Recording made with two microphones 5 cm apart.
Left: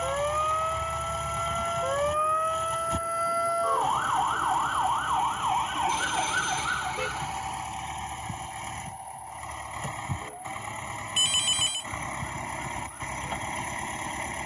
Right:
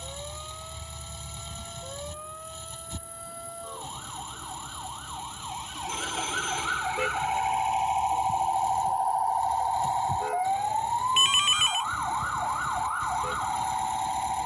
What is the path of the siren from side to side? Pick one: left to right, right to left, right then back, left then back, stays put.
left to right.